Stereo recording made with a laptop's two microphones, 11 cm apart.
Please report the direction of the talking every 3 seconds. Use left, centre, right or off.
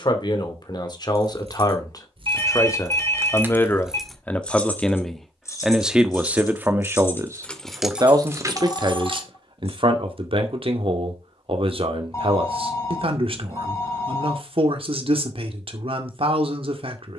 left, centre, right, right, right, right.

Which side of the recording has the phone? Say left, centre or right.
left.